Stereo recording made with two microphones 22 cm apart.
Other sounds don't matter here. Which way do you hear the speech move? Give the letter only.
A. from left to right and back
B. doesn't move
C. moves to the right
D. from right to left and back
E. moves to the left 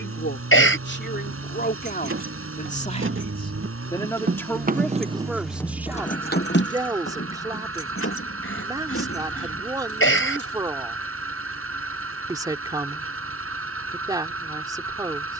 C.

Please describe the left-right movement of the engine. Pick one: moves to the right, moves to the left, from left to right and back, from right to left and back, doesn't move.
doesn't move.